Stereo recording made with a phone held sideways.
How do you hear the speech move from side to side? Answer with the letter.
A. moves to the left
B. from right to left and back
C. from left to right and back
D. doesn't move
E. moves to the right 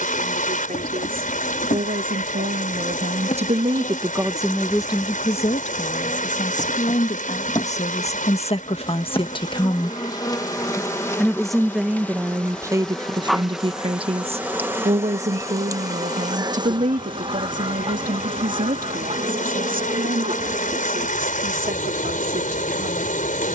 B.